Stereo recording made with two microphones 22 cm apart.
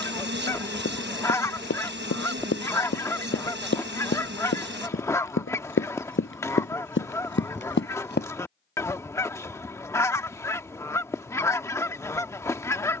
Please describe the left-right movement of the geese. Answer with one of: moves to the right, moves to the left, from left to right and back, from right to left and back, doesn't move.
doesn't move.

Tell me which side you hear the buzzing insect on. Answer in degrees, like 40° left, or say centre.
50° right.